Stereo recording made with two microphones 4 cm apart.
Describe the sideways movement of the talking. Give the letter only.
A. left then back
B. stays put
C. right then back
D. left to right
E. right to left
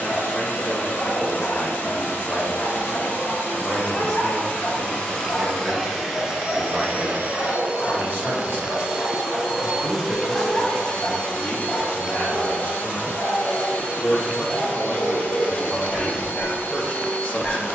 C.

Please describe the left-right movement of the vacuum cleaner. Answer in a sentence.
You can hear the vacuum cleaner go right and come back.